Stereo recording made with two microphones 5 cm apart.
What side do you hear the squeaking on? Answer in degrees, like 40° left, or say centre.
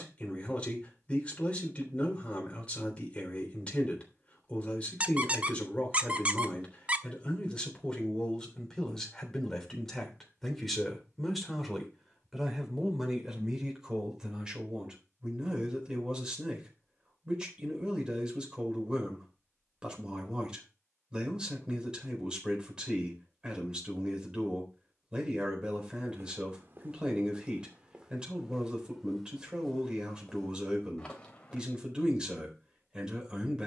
30° right.